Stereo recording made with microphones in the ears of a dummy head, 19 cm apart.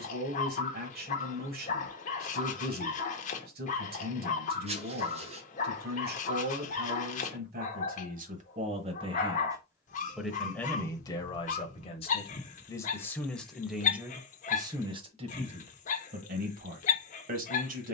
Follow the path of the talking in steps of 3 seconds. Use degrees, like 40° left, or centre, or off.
50° right, 50° right, 40° right, 10° left, centre, 40° right.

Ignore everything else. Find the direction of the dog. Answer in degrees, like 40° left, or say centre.
40° left.